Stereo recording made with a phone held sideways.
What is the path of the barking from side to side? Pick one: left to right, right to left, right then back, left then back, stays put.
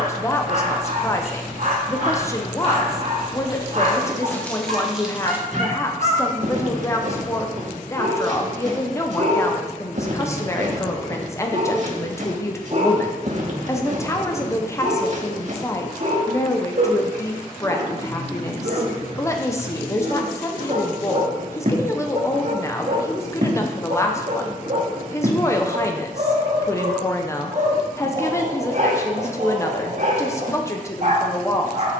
stays put.